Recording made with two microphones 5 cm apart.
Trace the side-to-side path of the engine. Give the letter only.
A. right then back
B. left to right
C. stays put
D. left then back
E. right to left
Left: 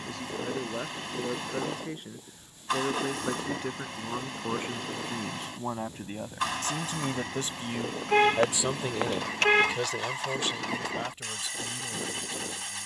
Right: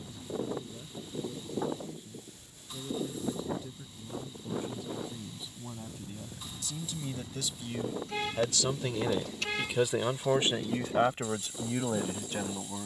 C.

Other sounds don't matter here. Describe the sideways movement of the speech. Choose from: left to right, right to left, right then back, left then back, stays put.
left to right.